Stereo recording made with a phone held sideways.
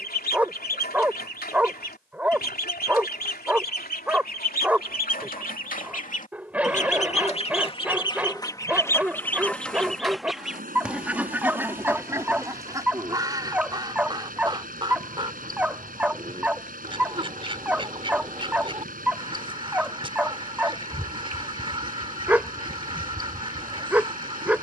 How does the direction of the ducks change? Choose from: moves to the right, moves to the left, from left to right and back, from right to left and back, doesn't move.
moves to the right.